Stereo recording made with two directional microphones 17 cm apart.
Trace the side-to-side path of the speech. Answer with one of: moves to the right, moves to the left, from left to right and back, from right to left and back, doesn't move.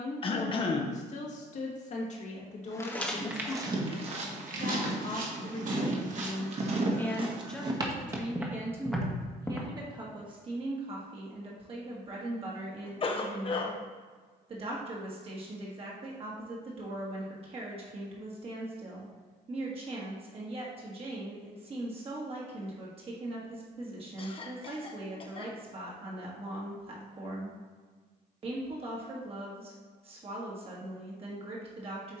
moves to the right.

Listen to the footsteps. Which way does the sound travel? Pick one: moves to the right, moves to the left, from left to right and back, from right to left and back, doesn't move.
from left to right and back.